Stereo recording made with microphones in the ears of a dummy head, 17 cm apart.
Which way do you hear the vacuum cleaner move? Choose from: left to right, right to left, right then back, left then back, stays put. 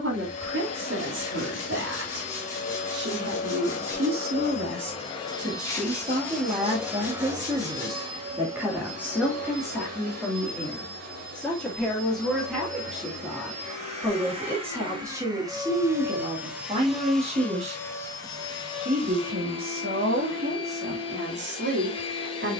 right then back.